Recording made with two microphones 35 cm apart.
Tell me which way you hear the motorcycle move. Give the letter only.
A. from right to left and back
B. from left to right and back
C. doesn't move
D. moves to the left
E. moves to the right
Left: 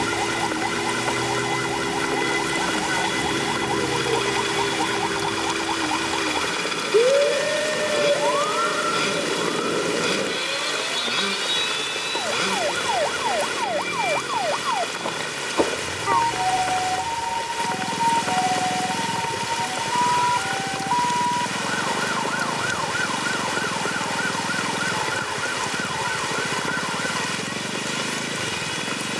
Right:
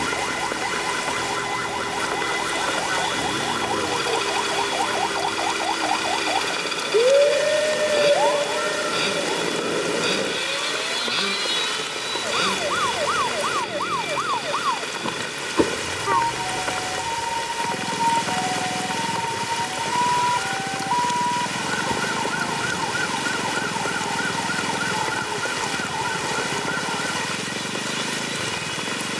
C.